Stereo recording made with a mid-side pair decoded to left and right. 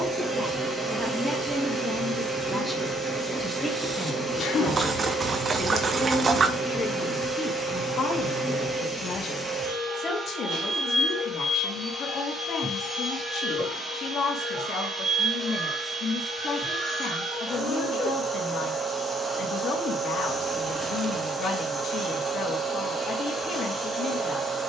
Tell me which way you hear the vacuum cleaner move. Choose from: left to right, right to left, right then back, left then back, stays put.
stays put.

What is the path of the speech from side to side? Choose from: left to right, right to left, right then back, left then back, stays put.
right to left.